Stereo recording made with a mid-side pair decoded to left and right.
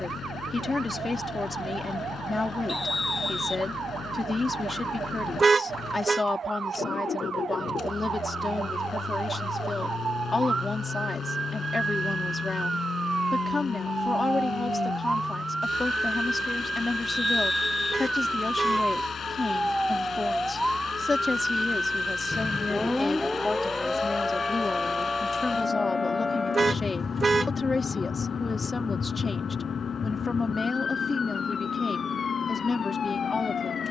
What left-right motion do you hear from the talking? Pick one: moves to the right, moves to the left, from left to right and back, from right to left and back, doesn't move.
doesn't move.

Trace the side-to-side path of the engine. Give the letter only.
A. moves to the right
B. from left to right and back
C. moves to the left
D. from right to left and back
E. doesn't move
E.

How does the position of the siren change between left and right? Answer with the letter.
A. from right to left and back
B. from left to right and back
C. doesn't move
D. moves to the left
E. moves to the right
D.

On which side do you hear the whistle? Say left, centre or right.
left.